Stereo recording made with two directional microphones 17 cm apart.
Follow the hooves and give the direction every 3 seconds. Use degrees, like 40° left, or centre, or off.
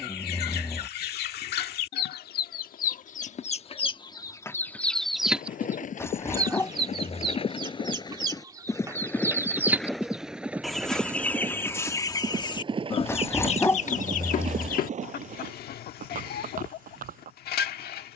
off, 50° left, 30° left, 10° right, 30° right, 50° right.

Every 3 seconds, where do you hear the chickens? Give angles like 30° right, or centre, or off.
60° left, 20° left, 20° right, centre, 40° left, 60° left.